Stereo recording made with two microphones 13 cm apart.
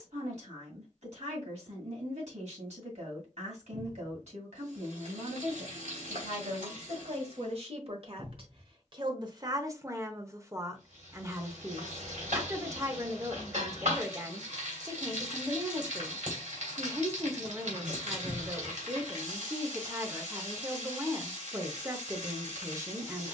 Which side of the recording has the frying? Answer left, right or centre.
right.